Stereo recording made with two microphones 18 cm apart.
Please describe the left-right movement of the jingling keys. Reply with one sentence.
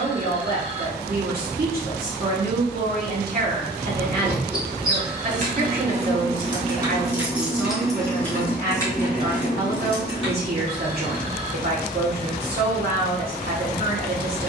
You can hear the jingling keys go from the right side to the left.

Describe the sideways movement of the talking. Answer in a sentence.
In this clip you hear the talking stay in one place.